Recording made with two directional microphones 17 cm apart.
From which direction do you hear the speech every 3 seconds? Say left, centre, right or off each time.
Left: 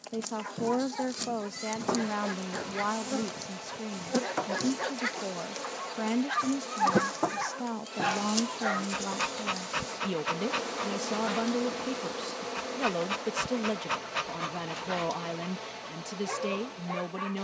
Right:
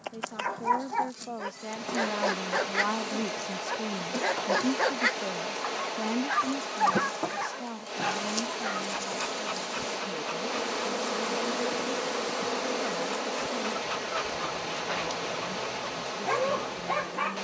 left, centre, left, left, left, left.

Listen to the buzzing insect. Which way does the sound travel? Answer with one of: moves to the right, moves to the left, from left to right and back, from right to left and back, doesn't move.
moves to the right.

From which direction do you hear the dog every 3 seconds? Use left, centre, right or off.
right, right, centre, left, left, right.